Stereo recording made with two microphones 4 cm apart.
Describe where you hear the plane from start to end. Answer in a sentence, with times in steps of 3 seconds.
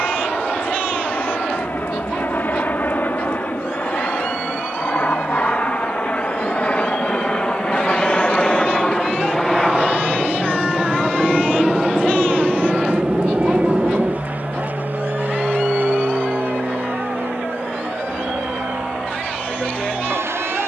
You can hear the plane on the left from 0 s, in the centre from 9 s and on the right from 12 s.